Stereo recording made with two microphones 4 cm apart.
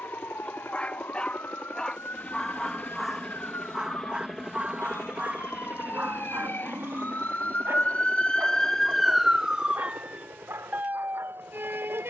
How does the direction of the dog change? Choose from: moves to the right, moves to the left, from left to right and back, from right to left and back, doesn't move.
moves to the right.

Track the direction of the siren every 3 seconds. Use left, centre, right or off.
left, left, left, right.